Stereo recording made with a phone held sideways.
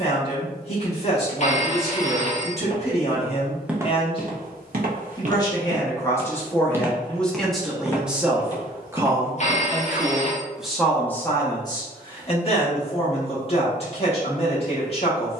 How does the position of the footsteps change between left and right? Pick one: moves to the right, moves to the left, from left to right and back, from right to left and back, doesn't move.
from left to right and back.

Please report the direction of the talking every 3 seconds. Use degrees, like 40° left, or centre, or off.
40° left, 30° left, centre, centre, 40° left.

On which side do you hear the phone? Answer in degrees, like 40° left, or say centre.
50° left.